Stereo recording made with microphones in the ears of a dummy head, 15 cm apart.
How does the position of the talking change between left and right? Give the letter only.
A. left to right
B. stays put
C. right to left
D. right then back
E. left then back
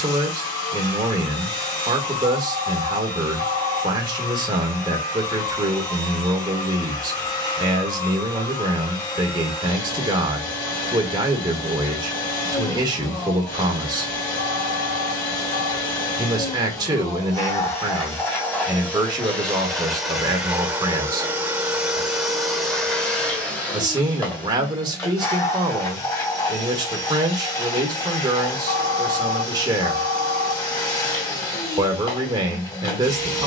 B.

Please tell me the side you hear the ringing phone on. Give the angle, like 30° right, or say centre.
60° left.